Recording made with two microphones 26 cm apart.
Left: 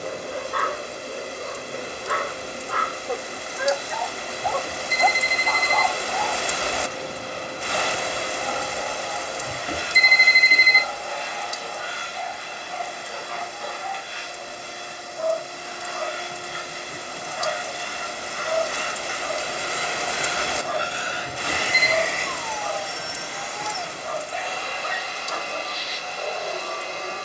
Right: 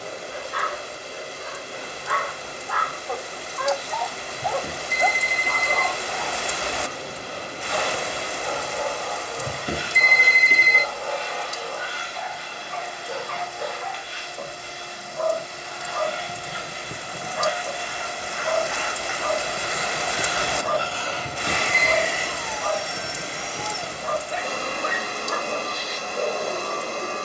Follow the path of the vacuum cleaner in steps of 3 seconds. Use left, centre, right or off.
left, left, left, left, left, left, left, centre, right.